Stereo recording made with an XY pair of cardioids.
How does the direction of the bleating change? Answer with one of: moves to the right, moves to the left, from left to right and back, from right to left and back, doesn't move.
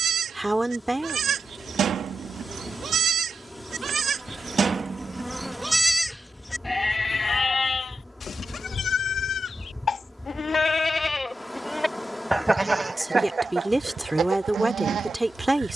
from right to left and back.